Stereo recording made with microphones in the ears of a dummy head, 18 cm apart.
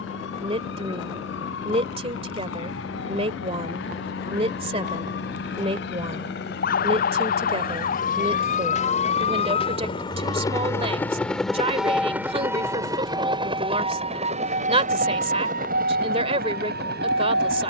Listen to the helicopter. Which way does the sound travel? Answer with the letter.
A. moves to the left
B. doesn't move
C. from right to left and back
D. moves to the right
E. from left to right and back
D.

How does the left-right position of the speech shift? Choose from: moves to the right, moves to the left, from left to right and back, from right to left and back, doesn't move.
doesn't move.